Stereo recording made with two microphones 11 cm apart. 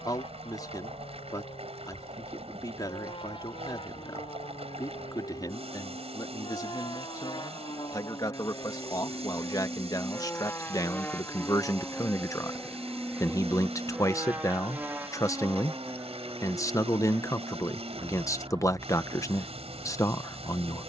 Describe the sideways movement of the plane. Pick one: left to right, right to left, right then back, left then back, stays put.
left to right.